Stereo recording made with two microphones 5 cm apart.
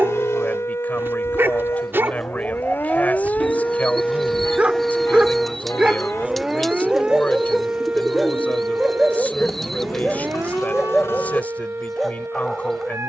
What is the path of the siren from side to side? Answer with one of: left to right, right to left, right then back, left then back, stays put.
left to right.